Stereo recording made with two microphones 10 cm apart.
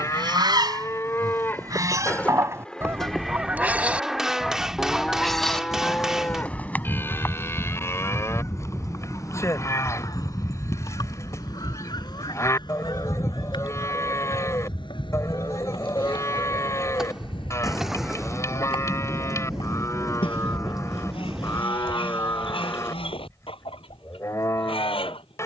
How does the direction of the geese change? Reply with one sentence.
In this clip you hear the geese go from the right side to the left.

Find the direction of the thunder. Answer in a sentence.
In this clip you hear the thunder in the centre.